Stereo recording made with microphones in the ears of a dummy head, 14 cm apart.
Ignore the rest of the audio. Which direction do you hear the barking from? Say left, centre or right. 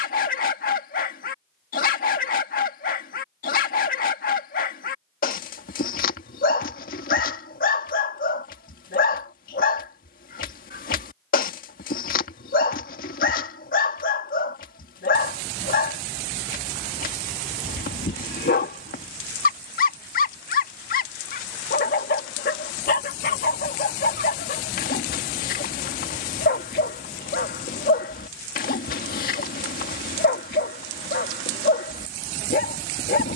left.